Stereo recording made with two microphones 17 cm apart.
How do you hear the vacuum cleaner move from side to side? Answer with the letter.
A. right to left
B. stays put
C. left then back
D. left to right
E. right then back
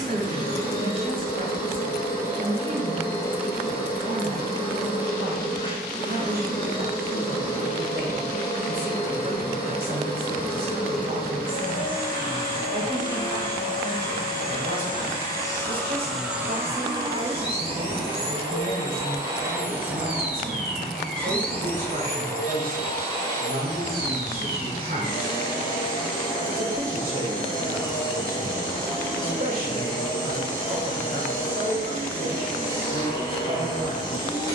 E.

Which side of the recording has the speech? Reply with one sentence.
In this clip you hear the speech on the right.